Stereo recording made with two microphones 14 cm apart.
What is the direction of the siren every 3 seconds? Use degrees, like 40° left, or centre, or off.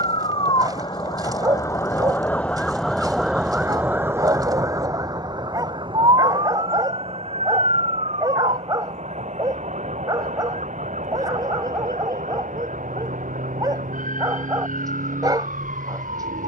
20° left, 20° right, 50° right, 60° right, 70° right, 70° right.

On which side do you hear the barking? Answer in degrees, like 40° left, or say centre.
30° right.